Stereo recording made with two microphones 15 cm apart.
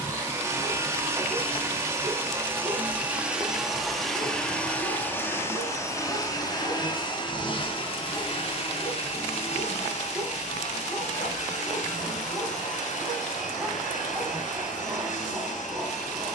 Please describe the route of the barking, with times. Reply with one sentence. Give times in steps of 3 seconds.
You can hear the barking on the left from 0 s and in the centre from 9 s.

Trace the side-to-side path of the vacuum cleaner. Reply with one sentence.
In this clip you hear the vacuum cleaner travel towards the left.